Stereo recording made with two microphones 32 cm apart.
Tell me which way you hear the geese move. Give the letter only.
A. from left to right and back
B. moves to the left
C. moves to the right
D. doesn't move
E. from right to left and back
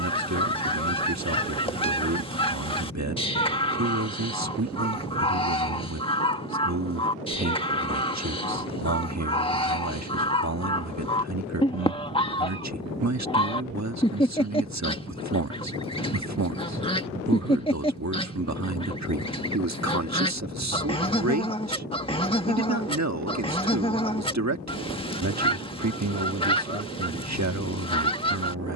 D.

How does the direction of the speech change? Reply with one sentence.
In this clip you hear the speech stay put.